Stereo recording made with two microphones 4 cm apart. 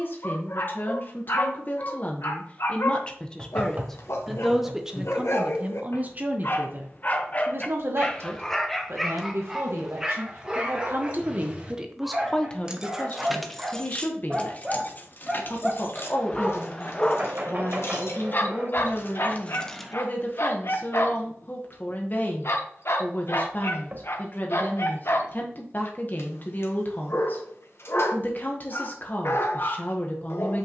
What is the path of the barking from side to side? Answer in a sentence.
In this clip you hear the barking go right and come back.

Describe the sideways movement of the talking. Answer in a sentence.
In this clip you hear the talking move from left to right and back again.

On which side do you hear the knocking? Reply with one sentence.
You can hear the knocking on the right.